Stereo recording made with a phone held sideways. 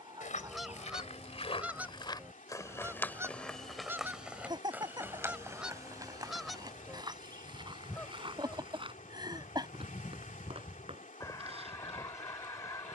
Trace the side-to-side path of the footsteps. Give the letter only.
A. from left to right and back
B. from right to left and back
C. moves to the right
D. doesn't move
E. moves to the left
C.